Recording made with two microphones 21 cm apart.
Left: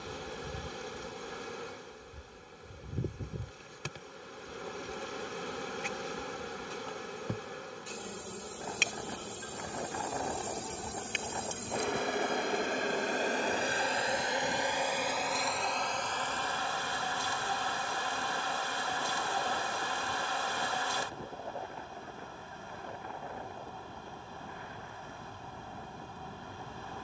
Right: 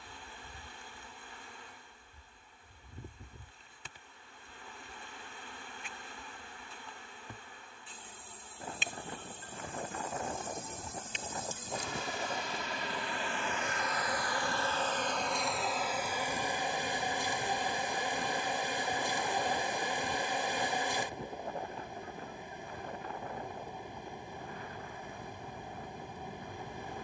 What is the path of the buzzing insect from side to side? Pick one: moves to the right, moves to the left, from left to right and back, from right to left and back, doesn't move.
moves to the right.